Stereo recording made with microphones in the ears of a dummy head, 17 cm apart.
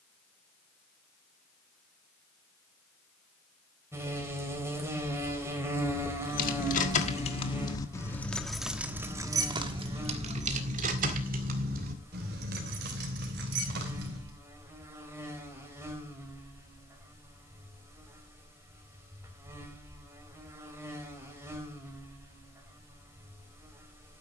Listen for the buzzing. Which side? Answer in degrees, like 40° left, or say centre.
10° right.